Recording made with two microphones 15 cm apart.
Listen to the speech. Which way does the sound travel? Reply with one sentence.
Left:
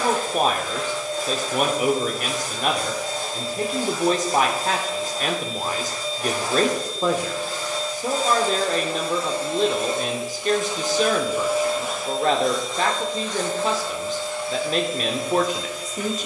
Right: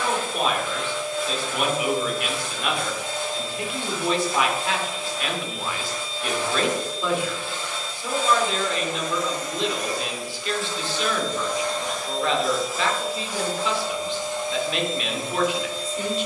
You can hear the speech stay put.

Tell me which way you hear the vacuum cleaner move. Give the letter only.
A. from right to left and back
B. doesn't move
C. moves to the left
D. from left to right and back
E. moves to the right
E.